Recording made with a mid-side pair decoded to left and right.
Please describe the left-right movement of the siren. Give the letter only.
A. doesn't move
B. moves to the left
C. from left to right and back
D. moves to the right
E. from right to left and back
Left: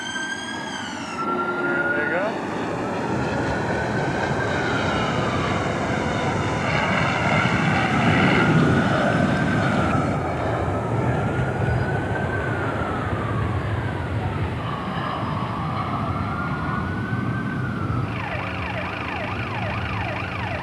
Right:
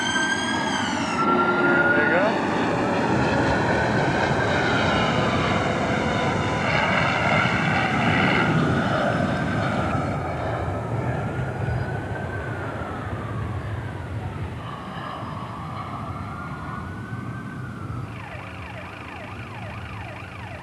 B.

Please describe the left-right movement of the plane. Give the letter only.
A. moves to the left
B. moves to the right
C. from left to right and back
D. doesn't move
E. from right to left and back
A.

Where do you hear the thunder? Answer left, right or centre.
left.